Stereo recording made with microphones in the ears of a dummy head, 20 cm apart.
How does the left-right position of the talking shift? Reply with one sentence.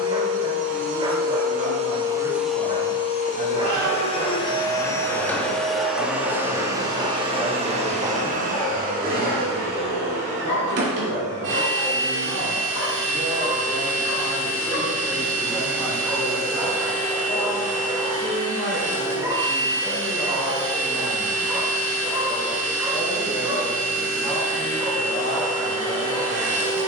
You can hear the talking go right and come back.